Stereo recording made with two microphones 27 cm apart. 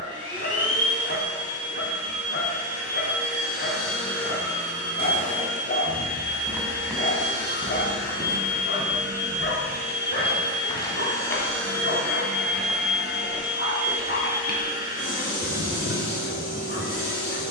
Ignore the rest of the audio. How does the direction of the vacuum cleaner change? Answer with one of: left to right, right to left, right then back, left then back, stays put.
left then back.